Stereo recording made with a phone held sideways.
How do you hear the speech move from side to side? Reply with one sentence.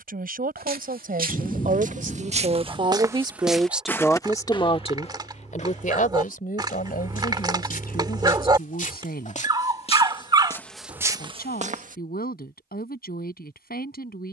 You can hear the speech travel towards the left.